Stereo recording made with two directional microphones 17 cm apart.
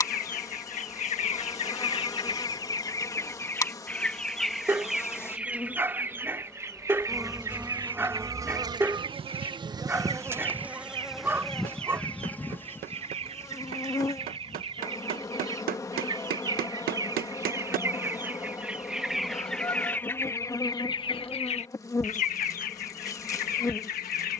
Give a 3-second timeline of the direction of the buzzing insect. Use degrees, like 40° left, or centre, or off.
20° left, 20° left, 10° right, 10° right, 20° left, 20° left, 20° left, 20° left.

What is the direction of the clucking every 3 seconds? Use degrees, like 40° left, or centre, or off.
40° left, centre, 20° right, 30° right, 40° right, 20° right, centre, 50° left.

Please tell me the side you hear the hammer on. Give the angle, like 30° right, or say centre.
60° right.